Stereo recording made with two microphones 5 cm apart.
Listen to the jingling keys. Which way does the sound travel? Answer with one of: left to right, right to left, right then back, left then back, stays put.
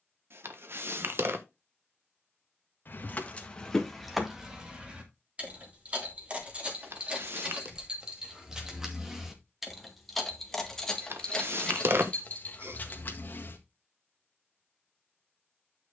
right then back.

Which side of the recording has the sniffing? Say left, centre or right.
right.